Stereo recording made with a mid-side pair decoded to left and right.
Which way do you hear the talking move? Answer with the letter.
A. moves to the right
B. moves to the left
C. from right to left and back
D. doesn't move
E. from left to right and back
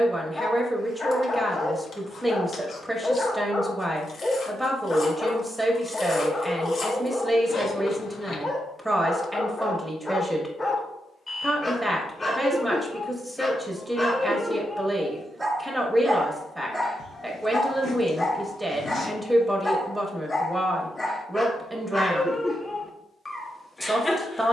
D.